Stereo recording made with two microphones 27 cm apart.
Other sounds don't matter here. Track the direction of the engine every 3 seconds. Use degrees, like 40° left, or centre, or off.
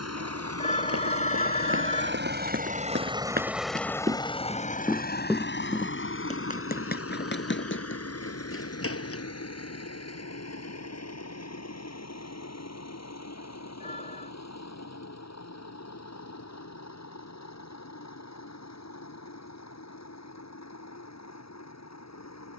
50° right, 20° left, 60° left, 70° left, 70° left, 80° left, 80° left, 80° left.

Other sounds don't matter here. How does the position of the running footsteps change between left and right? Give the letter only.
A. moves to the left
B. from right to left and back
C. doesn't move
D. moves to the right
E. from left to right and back
A.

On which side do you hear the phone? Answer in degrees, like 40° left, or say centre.
30° left.